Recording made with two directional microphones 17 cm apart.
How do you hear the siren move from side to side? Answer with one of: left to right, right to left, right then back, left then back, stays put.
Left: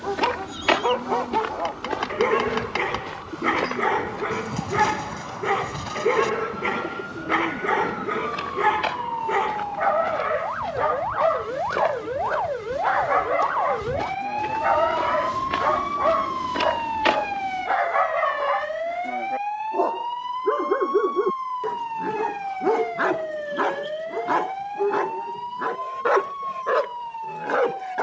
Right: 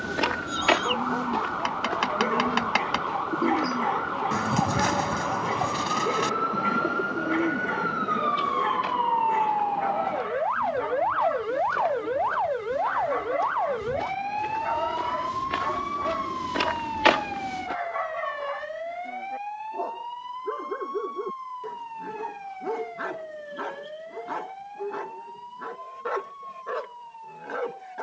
right to left.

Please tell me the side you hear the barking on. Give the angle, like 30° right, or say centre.
50° left.